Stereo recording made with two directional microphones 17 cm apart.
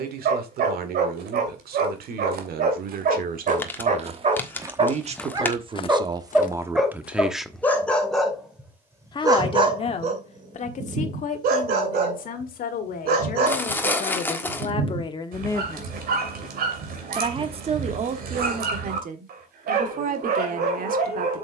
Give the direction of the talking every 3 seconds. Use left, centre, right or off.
right, right, centre, left, left, centre, right.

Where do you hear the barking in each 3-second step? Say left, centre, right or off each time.
right, right, centre, right, right, right, right.